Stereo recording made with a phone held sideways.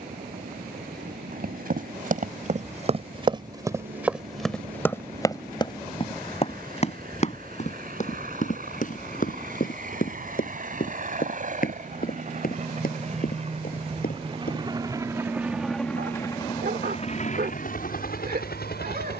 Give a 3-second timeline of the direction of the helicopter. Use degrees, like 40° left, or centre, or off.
70° right, 70° right, 60° right, 60° right, 40° right, 20° left, 70° left.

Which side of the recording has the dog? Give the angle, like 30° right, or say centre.
70° right.